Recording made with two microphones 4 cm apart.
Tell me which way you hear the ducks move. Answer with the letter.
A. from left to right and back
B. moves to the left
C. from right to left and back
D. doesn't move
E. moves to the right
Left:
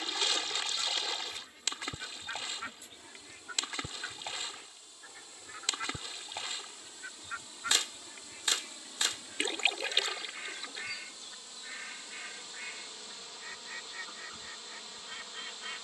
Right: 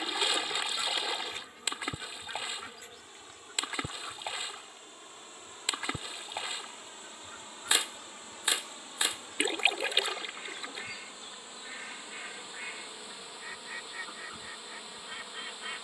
C.